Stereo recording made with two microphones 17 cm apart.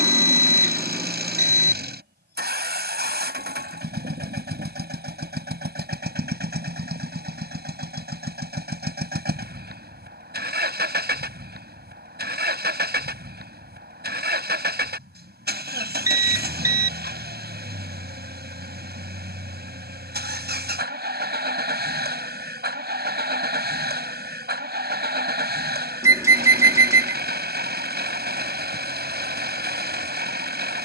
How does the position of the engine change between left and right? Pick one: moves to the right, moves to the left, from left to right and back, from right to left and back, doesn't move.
doesn't move.